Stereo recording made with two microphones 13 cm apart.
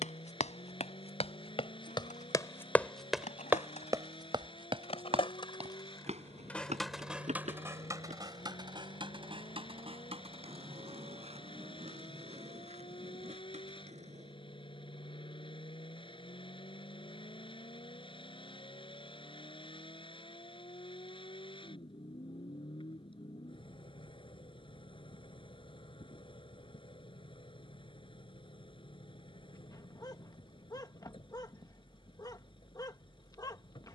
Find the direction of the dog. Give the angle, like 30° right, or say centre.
30° left.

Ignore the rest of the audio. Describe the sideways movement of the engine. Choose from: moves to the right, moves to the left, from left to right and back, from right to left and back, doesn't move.
doesn't move.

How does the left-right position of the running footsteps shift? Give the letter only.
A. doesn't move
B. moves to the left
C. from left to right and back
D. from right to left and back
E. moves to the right
E.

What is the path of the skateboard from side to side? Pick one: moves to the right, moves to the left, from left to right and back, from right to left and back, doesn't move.
moves to the right.